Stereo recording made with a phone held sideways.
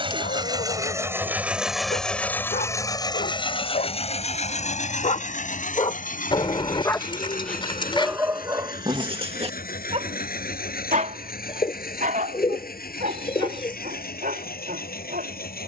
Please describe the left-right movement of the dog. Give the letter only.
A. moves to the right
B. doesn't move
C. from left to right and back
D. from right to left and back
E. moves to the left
A.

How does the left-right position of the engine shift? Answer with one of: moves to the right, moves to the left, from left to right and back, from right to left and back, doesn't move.
moves to the left.